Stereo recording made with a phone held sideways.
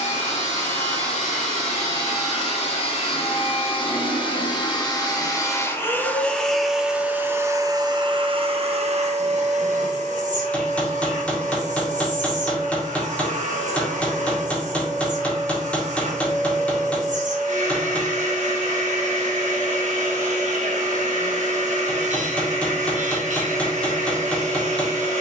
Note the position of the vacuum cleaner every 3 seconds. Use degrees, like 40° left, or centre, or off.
50° left, 30° left, 20° right, 60° right, 70° right, 70° right, 70° right, 70° right, 70° right.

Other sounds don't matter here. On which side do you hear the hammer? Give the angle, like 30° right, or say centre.
10° left.